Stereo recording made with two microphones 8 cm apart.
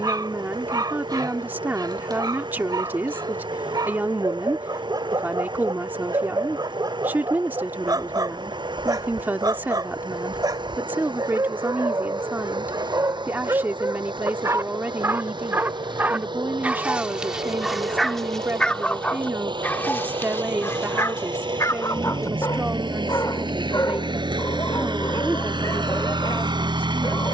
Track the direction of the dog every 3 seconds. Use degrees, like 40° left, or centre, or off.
60° right, 60° right, 60° right, 60° right, 50° right, 20° right, 20° left, 50° left, 50° left.